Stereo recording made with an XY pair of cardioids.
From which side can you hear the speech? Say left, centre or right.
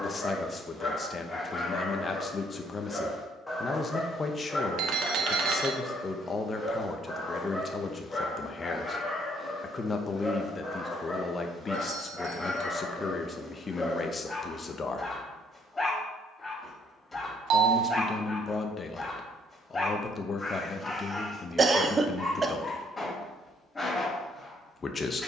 left.